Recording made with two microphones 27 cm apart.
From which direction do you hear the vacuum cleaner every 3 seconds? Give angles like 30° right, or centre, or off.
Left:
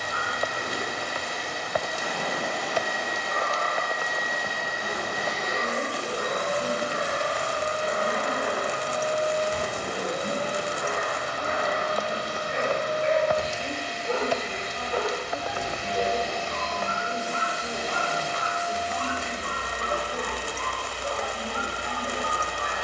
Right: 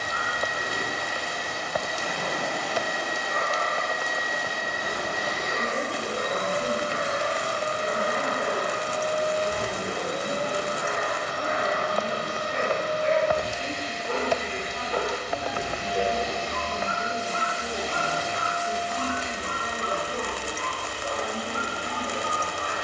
10° left, 30° right, 70° right, 70° right, 70° right, 70° right, 70° right, 70° right.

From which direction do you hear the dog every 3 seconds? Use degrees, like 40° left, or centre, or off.
50° left, 50° left, 50° left, 40° left, 10° left, 10° right, 20° right, 20° right.